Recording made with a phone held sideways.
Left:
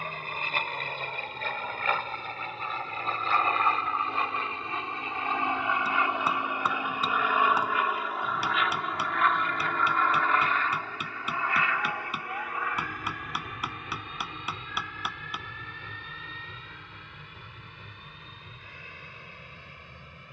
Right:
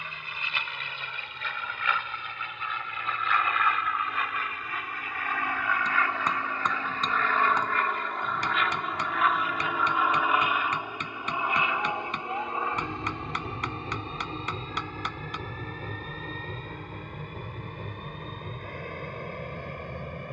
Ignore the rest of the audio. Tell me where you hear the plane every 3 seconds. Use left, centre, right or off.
left, left, centre, centre, right, right, right.